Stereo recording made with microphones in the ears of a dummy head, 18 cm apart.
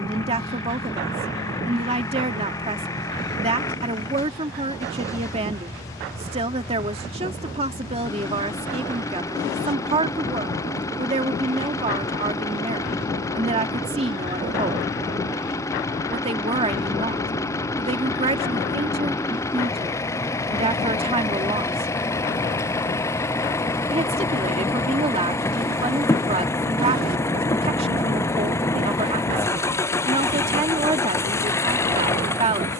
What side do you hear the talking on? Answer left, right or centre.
right.